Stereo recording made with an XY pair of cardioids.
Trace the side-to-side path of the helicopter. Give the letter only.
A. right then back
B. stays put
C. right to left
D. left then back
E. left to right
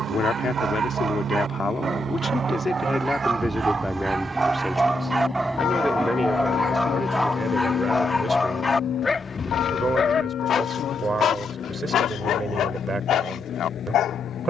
C.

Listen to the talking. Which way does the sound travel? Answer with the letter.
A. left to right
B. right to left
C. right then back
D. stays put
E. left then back
A.